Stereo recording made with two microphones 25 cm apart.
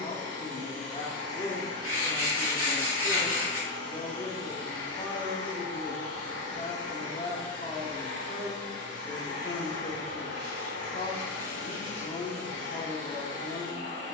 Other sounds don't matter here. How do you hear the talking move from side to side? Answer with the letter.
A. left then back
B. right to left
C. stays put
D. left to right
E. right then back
C.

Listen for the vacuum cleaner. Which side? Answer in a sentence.
You can hear the vacuum cleaner on the right.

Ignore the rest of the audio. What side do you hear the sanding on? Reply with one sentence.
In this clip you hear the sanding on the left.